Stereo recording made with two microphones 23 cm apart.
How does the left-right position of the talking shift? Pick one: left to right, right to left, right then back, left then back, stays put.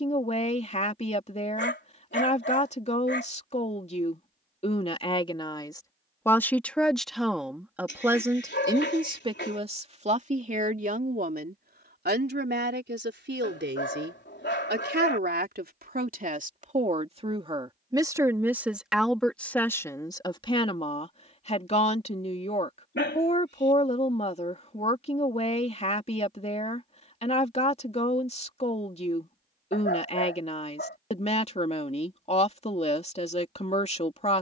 right then back.